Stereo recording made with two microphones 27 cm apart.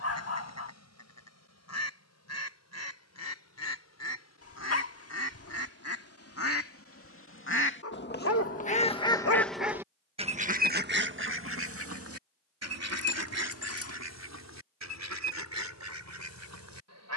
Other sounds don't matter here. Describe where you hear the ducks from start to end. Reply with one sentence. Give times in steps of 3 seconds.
You can hear the ducks on the left from 0 s and on the right from 9 s.